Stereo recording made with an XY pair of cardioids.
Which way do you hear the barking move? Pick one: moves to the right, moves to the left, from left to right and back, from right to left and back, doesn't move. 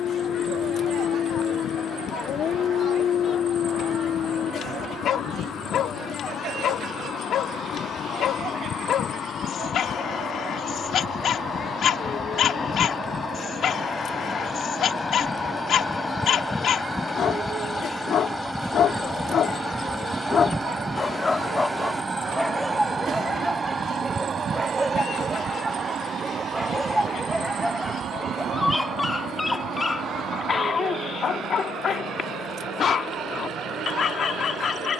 from left to right and back.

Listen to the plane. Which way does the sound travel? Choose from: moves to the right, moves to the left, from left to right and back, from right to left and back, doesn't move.
moves to the right.